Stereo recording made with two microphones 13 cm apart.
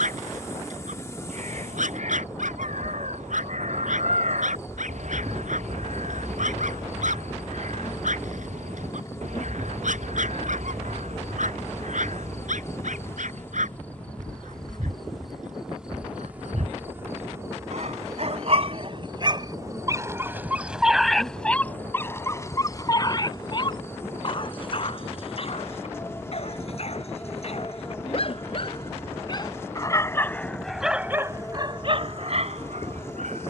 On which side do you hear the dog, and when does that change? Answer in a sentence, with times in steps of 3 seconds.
You can hear the dog on the right from 0 s, on the left from 21 s and on the right from 30 s.